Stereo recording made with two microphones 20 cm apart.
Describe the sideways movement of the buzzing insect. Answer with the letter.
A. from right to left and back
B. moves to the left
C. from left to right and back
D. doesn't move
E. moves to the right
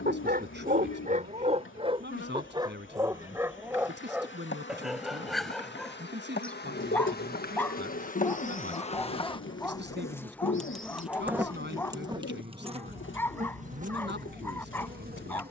E.